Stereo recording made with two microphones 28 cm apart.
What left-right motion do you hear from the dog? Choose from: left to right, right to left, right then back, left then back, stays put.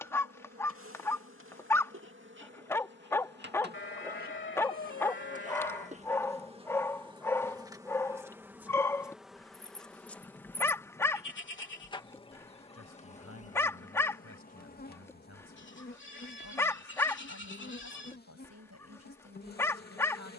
stays put.